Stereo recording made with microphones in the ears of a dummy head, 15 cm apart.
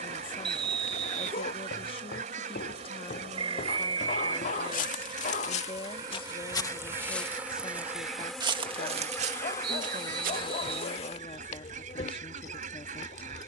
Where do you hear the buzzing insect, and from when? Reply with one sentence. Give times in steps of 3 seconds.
You can hear the buzzing insect on the right from 0 s, in the centre from 6 s and on the left from 9 s.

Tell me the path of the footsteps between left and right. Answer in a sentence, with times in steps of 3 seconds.
You can hear the footsteps on the left from 0 s, in the centre from 6 s, on the right from 9 s and not at all from 12 s.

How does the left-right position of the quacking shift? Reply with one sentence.
You can hear the quacking stay in one place.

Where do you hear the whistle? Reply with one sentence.
In this clip you hear the whistle on the right.